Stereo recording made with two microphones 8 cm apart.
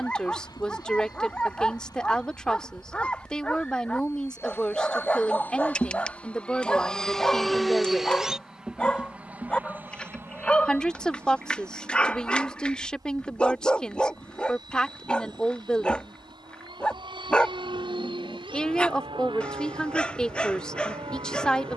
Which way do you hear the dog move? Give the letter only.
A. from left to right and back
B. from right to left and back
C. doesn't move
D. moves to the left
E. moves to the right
C.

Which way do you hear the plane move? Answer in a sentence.
You can hear the plane travel towards the right.